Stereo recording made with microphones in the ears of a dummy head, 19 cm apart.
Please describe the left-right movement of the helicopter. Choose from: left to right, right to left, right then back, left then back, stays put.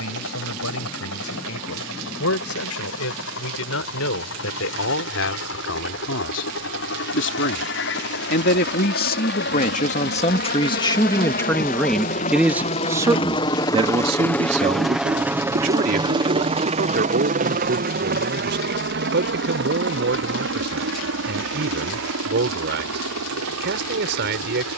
left to right.